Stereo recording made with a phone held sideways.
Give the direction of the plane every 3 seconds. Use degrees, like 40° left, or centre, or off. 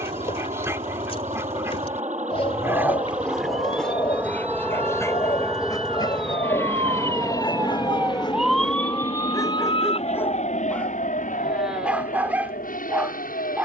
40° right, 10° right, 30° left, 50° left, 60° left.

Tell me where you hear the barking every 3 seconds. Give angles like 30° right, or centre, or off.
20° right, 10° left, 30° left, 10° left, 10° right.